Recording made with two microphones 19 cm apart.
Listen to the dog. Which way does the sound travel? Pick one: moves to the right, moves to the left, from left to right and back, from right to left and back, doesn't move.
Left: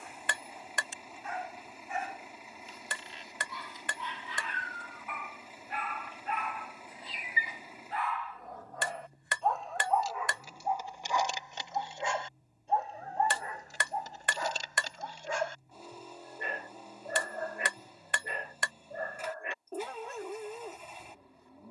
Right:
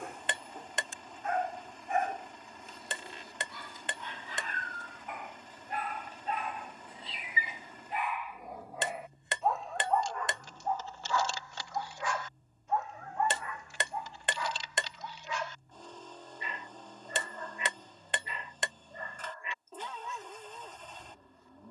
moves to the left.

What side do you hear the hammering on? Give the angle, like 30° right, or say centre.
20° right.